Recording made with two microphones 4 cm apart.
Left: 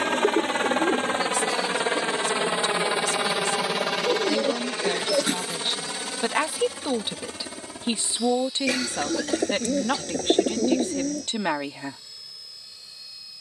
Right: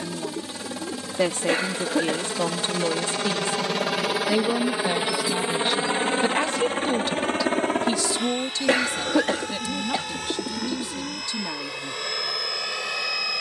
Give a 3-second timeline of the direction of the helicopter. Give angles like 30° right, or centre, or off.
40° left, 10° right, 40° right, 60° right, 60° right.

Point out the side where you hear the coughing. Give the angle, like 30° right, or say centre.
40° right.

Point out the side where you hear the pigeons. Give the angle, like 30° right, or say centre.
60° left.